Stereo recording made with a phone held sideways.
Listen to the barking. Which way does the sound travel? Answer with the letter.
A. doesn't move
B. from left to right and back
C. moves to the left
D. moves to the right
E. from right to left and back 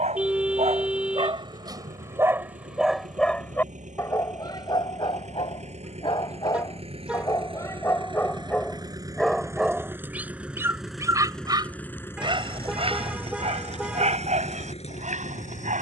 E.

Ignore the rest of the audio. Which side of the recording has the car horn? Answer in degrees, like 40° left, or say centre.
10° right.